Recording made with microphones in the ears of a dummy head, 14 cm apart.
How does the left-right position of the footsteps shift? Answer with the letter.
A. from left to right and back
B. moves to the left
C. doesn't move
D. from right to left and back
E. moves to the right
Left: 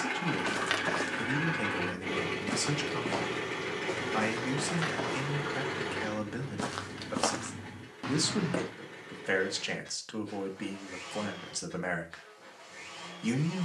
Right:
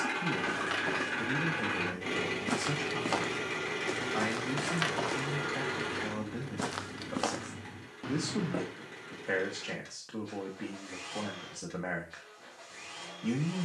A.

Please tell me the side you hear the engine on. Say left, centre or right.
right.